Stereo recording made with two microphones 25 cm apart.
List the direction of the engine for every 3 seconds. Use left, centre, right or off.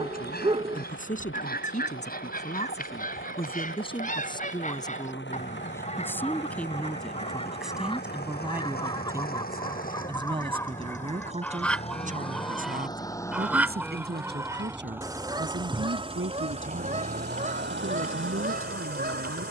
left, left, left, left, centre, right, right.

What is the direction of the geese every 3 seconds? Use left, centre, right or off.
left, left, left, centre, centre, right, right.